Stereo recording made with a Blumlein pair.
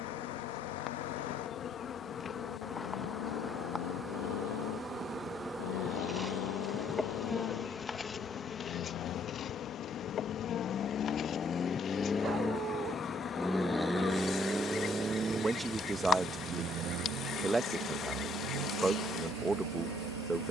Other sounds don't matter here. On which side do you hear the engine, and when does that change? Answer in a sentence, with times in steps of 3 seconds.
In this clip you hear the engine on the left from 0 s, in the centre from 12 s and on the right from 15 s.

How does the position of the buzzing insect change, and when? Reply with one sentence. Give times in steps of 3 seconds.
In this clip you hear the buzzing insect on the left from 0 s, in the centre from 3 s and on the left from 9 s.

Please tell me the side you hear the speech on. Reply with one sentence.
You can hear the speech in the centre.